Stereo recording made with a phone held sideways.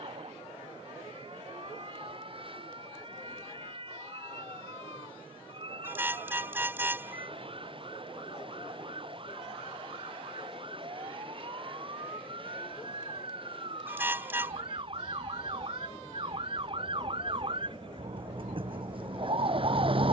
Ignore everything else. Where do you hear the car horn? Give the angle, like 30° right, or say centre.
10° right.